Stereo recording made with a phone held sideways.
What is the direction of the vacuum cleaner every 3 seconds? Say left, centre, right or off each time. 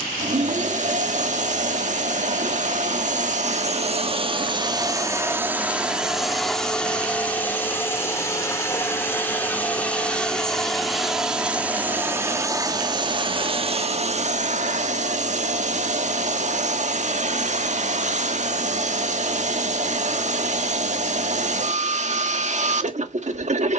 right, right, centre, centre, right, right, right, right.